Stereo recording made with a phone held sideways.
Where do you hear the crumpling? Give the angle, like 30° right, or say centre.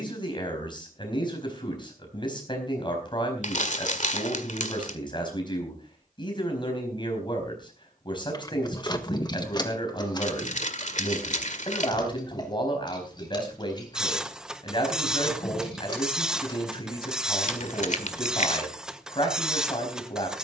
60° left.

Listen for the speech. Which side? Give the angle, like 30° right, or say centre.
30° left.